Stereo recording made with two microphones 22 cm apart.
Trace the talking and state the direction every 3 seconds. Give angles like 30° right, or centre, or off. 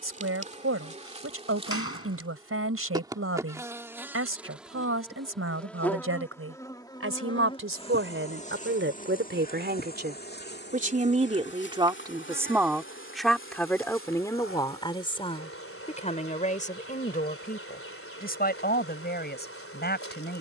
80° right, 80° right, 70° right, 40° right, centre, 30° left, 40° left.